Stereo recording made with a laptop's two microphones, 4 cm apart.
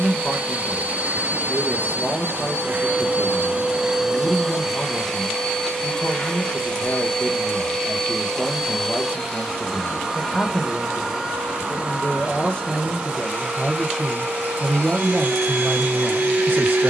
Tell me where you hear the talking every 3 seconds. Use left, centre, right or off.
left, left, left, left, centre, right.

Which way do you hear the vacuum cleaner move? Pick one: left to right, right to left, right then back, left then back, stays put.
left then back.